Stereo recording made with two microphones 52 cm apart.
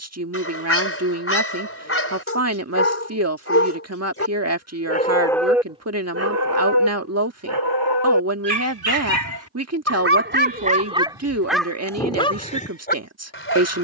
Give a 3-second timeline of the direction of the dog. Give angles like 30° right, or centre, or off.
20° left, 10° left, 50° right, 20° right, 20° left.